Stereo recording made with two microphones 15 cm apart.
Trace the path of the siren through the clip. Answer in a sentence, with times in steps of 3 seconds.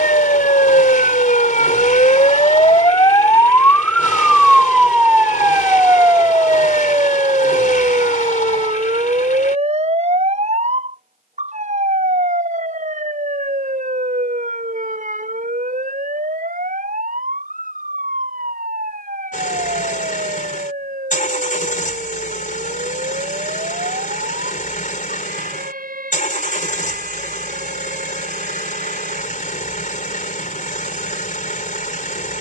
In this clip you hear the siren on the left from 0 s, in the centre from 3 s and on the right from 6 s.